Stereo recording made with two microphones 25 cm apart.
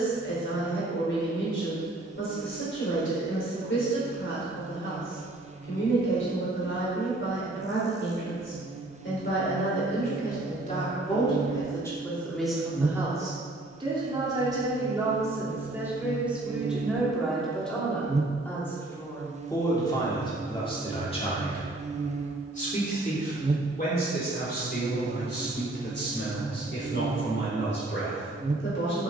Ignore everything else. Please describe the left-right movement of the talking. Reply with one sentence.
In this clip you hear the talking go right and come back.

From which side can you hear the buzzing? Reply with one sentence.
You can hear the buzzing on the right.